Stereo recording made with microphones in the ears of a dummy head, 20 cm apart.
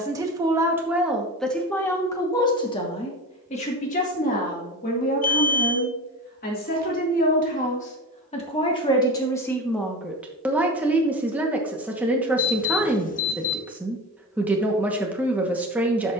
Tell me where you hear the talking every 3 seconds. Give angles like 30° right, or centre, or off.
centre, 30° left, 30° left, centre, 10° right, 10° right.